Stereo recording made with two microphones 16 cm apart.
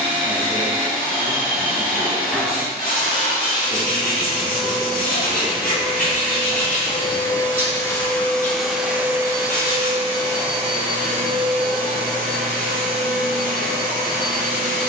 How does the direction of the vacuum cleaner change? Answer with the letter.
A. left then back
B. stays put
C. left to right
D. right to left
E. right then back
C.